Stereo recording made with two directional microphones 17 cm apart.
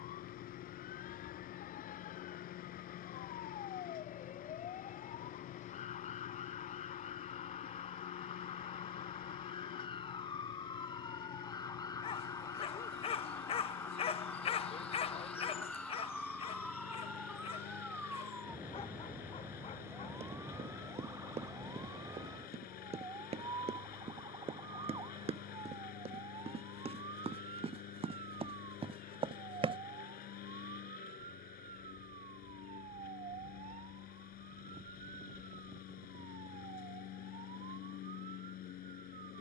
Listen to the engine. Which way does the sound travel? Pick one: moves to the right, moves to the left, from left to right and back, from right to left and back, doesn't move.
doesn't move.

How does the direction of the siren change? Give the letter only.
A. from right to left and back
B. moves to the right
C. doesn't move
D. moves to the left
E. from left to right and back
B.